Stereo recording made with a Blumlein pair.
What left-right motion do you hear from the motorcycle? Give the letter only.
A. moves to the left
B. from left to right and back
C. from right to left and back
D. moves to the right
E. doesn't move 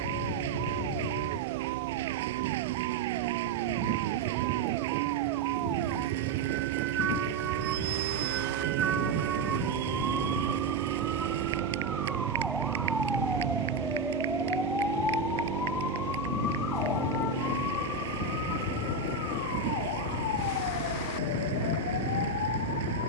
E.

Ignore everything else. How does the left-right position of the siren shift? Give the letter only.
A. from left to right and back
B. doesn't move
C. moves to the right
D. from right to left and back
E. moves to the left
E.